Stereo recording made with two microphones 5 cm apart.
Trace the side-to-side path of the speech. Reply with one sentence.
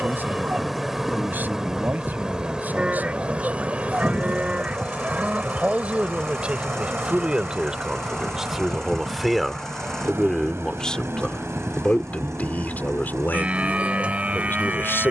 You can hear the speech go from the right side to the left.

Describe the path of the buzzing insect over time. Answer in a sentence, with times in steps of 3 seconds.
You can hear the buzzing insect in the centre from 0 s and on the right from 3 s.